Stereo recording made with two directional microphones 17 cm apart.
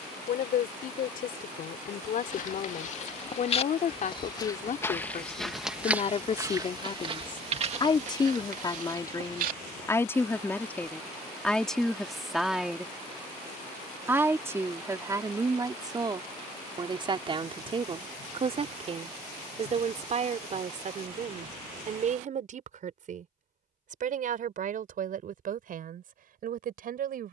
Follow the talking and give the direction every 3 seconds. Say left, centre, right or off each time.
left, left, left, centre, centre, right, right, right, right.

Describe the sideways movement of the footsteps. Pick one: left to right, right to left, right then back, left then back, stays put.
left to right.